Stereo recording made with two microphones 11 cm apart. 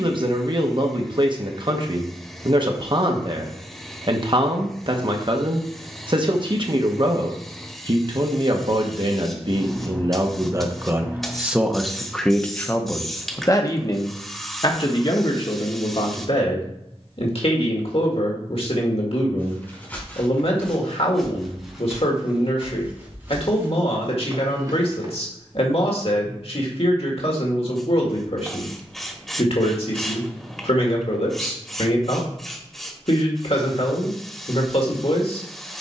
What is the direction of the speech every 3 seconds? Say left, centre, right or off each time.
right, right, right, right, left, left, left, left, left, left, left, left.